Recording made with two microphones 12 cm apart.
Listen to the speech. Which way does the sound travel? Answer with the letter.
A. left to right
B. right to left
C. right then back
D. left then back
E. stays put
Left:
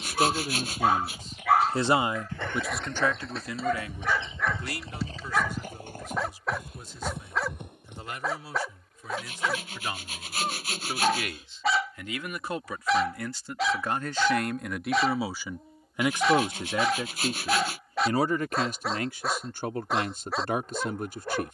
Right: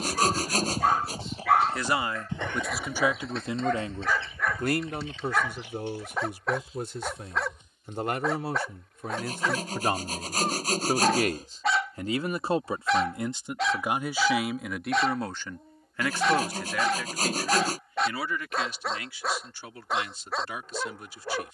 C.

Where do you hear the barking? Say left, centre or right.
centre.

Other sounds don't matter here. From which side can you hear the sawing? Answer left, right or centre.
right.